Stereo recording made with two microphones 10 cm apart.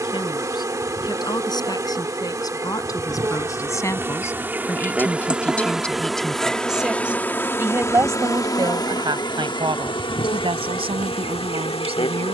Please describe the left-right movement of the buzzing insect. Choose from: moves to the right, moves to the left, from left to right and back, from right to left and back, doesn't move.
moves to the left.